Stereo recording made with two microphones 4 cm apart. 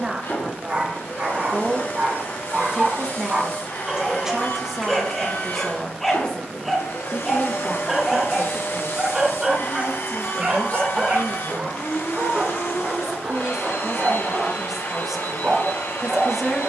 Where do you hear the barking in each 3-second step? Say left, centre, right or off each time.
right, centre, centre, right, right, right.